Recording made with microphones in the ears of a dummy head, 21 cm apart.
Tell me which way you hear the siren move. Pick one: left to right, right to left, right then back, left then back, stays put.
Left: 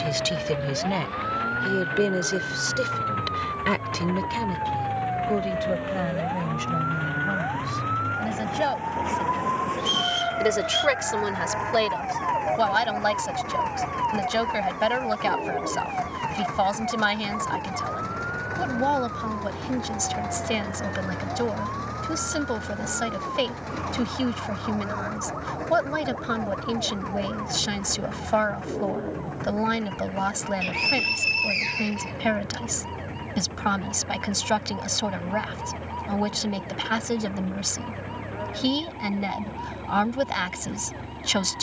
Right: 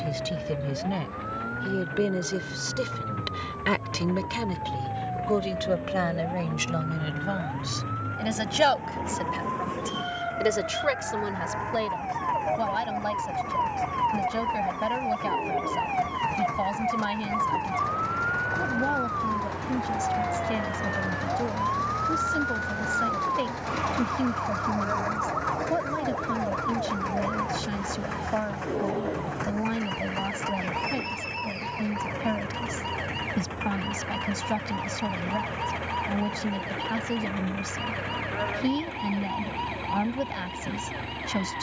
left to right.